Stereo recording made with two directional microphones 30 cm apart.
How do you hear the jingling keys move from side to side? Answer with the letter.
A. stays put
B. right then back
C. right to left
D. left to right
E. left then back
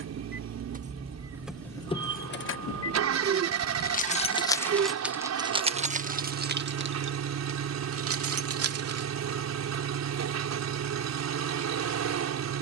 E.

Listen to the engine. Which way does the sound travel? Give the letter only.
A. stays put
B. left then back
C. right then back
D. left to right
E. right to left
A.